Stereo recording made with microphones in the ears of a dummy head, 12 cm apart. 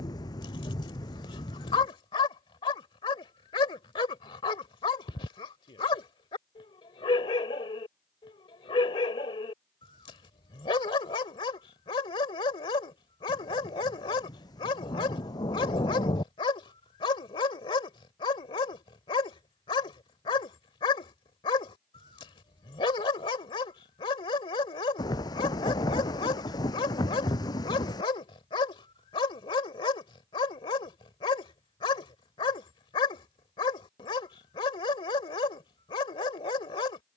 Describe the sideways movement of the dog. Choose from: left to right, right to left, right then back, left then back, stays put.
stays put.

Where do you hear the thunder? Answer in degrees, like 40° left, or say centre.
30° left.